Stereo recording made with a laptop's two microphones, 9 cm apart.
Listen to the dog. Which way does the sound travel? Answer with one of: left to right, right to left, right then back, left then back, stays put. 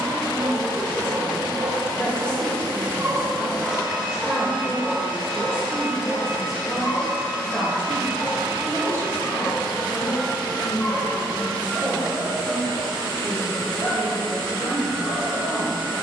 right to left.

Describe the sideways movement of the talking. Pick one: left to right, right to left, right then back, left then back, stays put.
right then back.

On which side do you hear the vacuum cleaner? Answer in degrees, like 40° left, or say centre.
70° left.